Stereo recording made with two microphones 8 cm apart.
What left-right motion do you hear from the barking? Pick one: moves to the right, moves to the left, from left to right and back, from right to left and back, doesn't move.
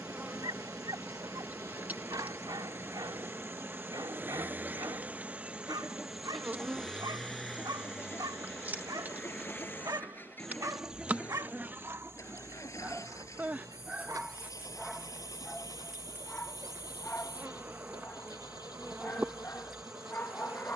moves to the left.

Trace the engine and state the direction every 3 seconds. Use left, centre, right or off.
right, right, centre, left, left, left, left.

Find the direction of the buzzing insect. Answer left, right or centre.
right.